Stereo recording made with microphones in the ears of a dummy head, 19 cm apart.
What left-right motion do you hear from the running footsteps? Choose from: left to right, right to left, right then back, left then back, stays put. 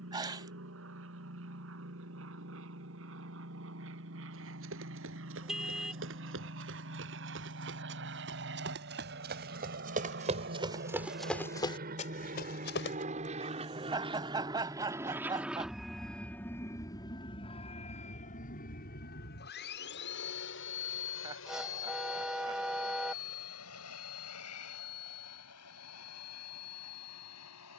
right to left.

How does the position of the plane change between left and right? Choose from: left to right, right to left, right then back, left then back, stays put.
right to left.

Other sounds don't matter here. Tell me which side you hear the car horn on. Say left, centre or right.
centre.